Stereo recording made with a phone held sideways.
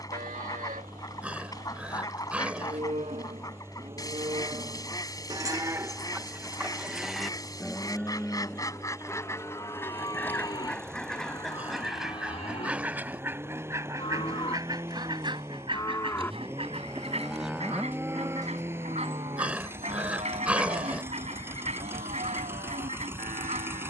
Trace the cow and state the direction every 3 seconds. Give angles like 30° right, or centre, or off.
60° right, 40° right, centre, 30° left, 40° left, 10° left, 40° right, 70° right.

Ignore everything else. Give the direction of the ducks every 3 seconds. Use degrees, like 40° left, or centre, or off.
30° left, 30° left, 30° left, 10° left, 20° right, 40° right, 50° right, 50° right.